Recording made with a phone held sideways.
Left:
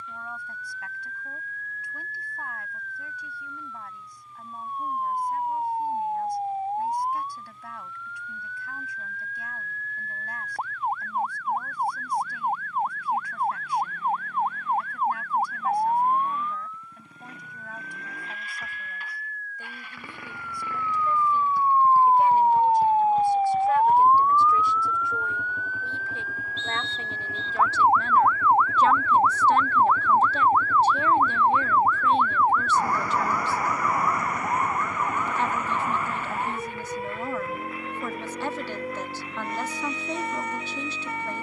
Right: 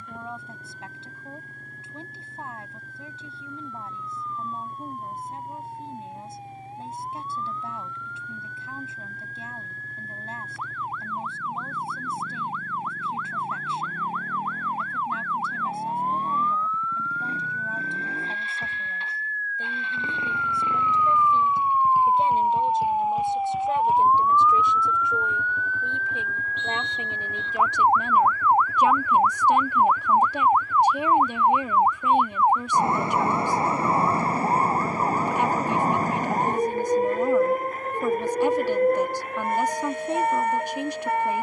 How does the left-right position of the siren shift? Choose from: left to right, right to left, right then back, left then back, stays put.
left to right.